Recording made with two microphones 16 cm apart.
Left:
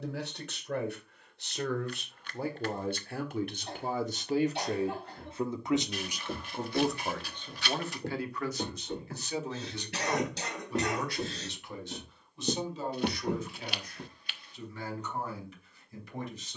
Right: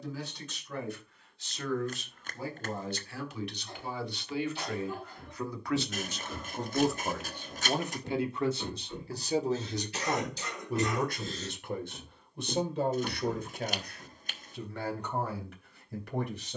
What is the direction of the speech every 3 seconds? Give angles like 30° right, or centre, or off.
60° left, 40° left, 10° right, 50° right, 60° right, 70° right.